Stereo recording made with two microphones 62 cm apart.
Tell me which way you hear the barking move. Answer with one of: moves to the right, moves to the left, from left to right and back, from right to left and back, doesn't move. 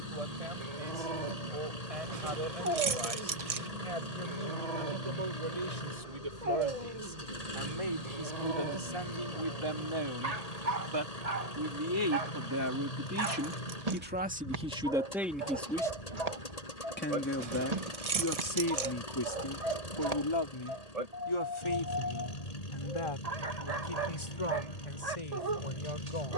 doesn't move.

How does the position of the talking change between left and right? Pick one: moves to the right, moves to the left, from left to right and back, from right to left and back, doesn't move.
moves to the left.